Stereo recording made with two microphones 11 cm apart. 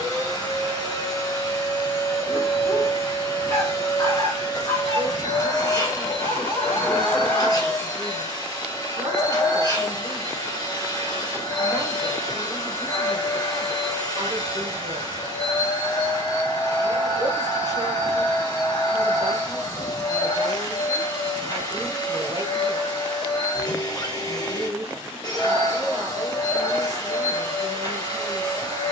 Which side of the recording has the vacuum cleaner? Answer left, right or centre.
left.